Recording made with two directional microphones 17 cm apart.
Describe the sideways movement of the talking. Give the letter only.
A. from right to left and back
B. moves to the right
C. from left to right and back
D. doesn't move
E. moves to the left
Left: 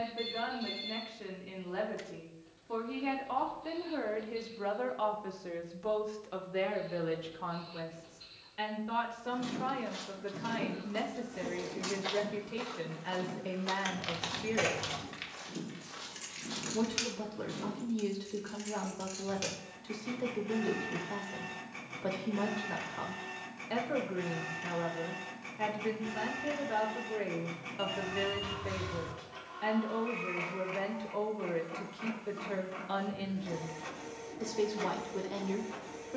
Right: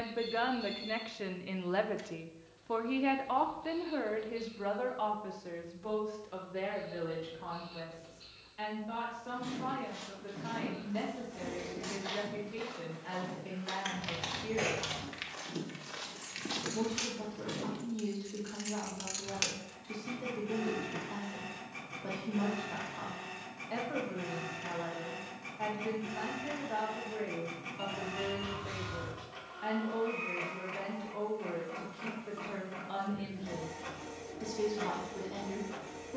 E.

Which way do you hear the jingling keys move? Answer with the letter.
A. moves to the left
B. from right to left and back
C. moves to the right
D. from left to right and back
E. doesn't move
C.